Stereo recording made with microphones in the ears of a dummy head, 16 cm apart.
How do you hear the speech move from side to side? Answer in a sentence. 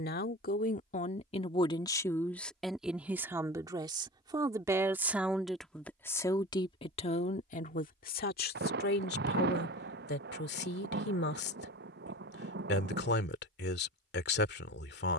In this clip you hear the speech move from left to right and back again.